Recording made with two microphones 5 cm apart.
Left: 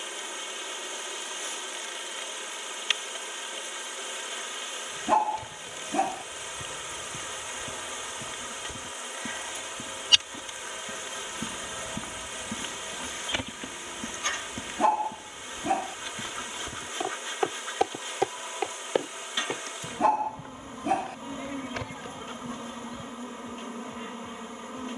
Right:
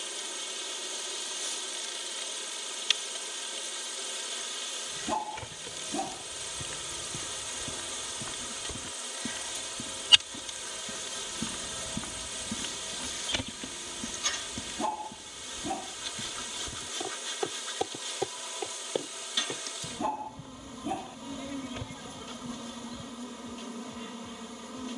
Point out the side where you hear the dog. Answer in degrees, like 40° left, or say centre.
70° left.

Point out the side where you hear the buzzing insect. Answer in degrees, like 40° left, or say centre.
30° left.